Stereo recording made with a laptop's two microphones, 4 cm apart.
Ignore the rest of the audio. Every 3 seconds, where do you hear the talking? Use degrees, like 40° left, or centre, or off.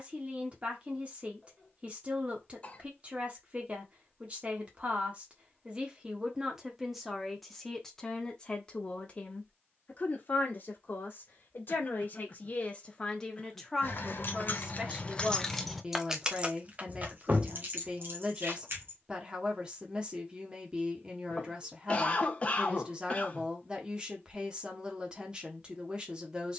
30° right, 30° right, centre, 40° left, 10° left, 20° right, 20° right, 20° right, 20° right.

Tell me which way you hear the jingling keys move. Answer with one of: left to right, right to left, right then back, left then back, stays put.
left to right.